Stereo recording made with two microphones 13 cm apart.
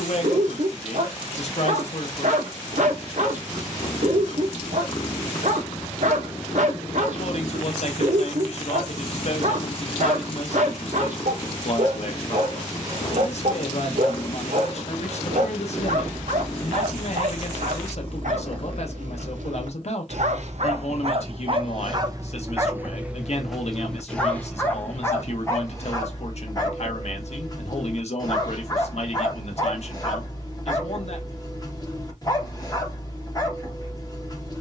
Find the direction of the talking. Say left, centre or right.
left.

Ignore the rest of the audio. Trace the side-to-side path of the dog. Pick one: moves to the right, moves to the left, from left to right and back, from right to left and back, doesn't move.
moves to the left.